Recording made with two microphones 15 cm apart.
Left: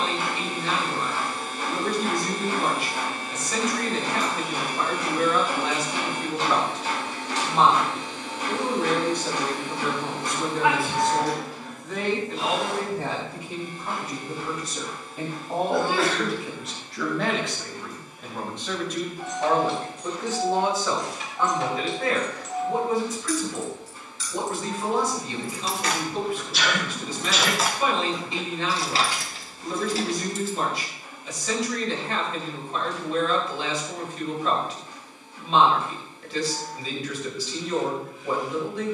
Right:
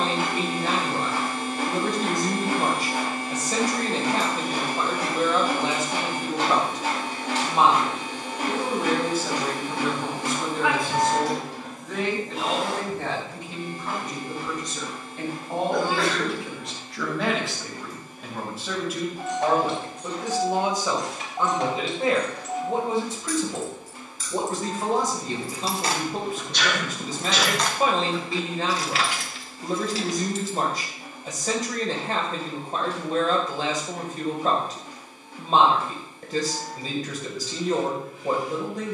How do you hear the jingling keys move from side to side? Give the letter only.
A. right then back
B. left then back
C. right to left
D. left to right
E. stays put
C.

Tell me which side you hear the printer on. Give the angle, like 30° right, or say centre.
80° right.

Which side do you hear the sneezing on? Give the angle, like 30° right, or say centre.
centre.